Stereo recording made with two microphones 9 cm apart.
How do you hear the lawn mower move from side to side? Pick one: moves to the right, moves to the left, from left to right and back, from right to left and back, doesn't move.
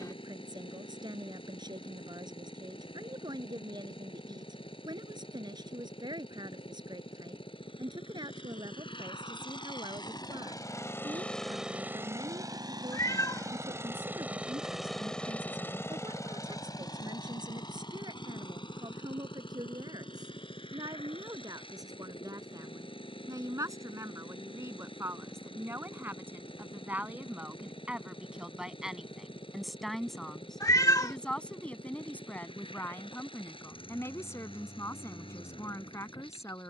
from left to right and back.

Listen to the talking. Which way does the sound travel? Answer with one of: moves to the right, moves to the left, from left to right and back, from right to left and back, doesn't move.
moves to the left.